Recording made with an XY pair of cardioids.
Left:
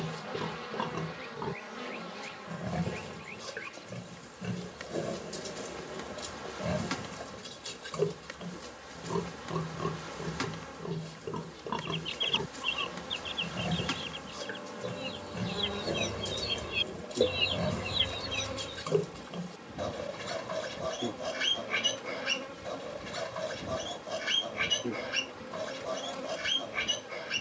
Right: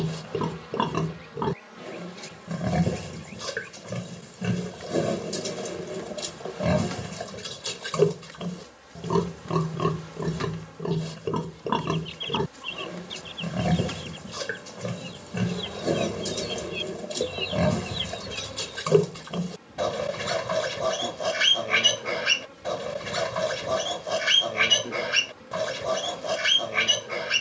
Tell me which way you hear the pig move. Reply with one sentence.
In this clip you hear the pig stay put.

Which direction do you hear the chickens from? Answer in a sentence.
You can hear the chickens in the centre.